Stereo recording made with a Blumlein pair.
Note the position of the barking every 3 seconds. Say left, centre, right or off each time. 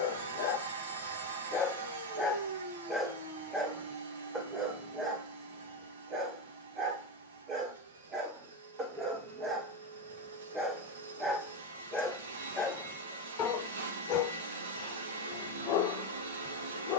left, centre, right, centre, left, left.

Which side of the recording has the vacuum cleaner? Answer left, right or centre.
right.